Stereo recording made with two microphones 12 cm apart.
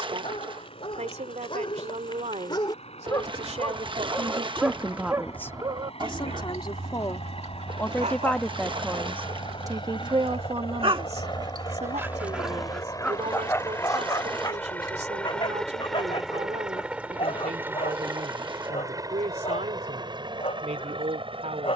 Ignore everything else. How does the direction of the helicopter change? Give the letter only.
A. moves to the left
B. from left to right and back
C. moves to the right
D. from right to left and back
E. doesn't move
C.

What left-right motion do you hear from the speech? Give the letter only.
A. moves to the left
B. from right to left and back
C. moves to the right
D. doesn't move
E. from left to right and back
B.